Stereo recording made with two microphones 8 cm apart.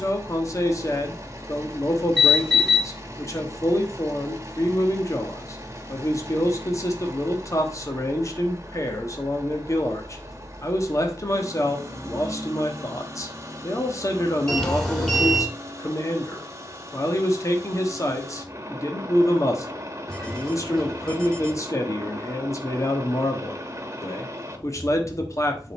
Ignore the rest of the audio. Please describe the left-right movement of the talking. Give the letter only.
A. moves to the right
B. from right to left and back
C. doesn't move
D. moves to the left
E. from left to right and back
C.